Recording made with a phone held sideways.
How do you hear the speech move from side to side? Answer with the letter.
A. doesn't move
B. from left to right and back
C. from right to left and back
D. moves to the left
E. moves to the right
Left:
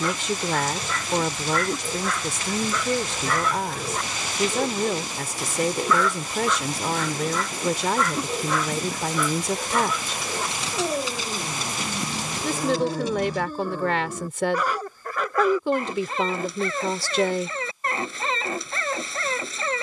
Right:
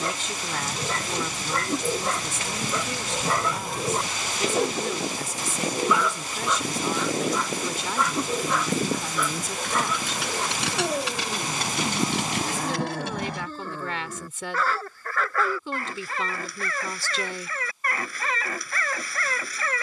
A.